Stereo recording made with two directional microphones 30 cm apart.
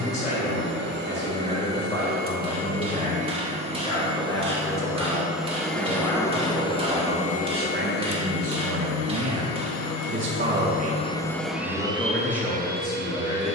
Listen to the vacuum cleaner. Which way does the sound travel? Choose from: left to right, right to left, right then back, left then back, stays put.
left then back.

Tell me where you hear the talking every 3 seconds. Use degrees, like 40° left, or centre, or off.
20° left, 10° left, 30° right, 30° right, 10° left.